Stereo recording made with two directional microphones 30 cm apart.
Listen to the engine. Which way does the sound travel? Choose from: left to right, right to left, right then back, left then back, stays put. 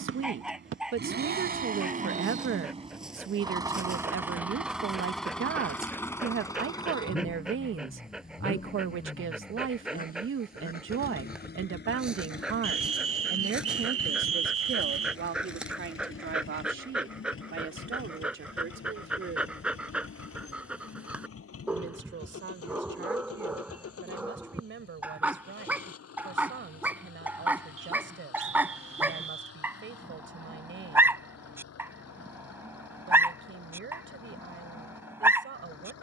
right to left.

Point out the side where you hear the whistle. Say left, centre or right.
right.